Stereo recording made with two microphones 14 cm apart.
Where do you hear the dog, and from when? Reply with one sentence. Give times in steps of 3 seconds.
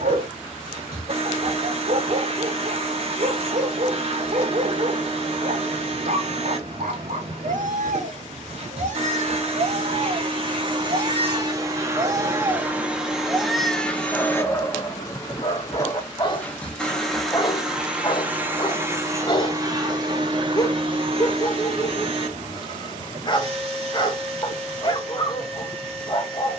In this clip you hear the dog on the right from 0 s, in the centre from 12 s and on the left from 15 s.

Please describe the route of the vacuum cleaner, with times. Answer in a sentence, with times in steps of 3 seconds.
In this clip you hear the vacuum cleaner on the right from 0 s, in the centre from 12 s and on the right from 18 s.